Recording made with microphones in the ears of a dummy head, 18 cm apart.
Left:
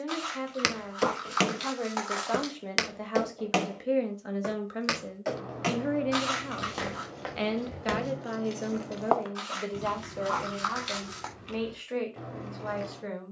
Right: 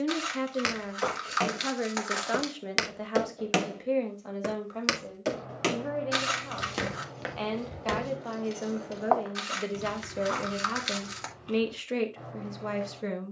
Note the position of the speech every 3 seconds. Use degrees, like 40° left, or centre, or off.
20° right, 10° left, 20° left, 30° right, 40° right.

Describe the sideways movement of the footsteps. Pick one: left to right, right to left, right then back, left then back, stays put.
right then back.